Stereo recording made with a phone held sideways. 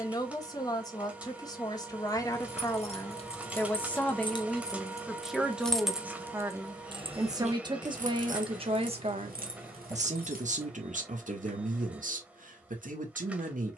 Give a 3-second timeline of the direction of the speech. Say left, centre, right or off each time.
left, centre, right, right, right.